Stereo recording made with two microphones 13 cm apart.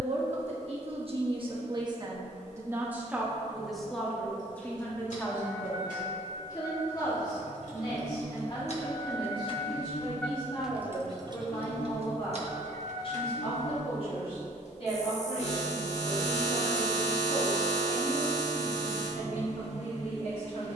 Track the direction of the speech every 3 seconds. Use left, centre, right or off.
right, centre, left, left, left, left, left.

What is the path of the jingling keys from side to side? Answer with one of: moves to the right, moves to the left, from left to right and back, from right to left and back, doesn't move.
moves to the right.